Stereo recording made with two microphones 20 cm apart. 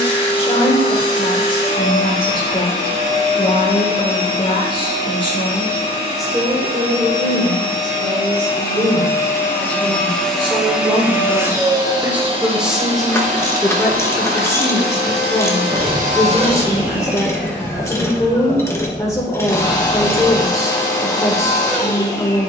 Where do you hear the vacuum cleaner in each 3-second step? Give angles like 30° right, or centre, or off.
30° left, 30° left, 30° left, centre, 40° right, 20° right, 20° left, 20° left.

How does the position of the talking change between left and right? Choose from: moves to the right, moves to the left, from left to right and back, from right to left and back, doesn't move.
from left to right and back.